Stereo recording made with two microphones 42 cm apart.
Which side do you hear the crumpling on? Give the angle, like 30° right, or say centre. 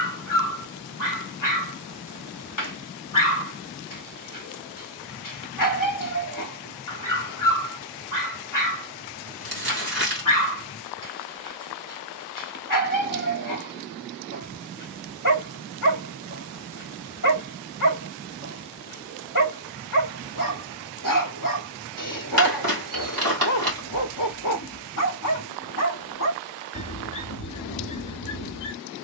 60° right.